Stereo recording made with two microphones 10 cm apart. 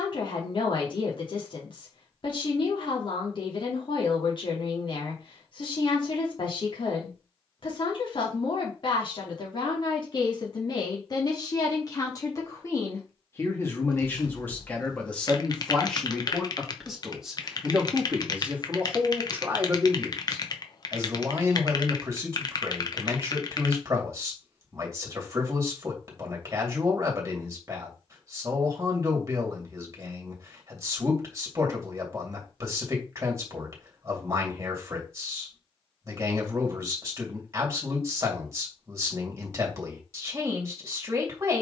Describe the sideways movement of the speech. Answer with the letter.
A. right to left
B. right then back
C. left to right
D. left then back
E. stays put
C.